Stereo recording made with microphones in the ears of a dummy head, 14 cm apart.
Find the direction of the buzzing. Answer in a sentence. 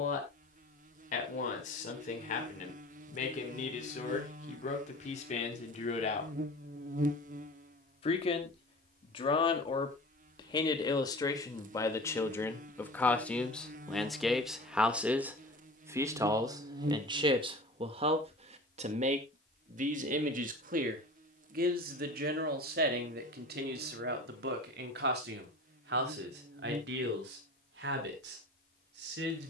In this clip you hear the buzzing on the right.